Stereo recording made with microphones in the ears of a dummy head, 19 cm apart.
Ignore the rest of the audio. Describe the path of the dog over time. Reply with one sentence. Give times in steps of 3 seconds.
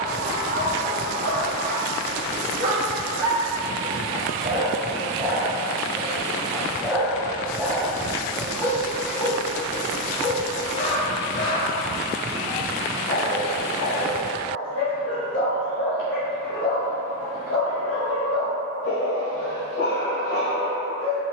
You can hear the dog on the right from 0 s, in the centre from 6 s and on the left from 9 s.